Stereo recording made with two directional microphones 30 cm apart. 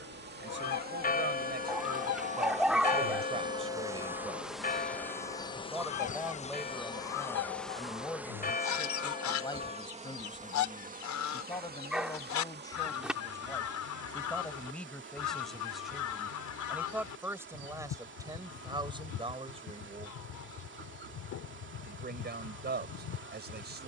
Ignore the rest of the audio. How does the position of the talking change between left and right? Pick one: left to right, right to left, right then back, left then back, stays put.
left then back.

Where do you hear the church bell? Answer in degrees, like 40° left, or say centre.
30° left.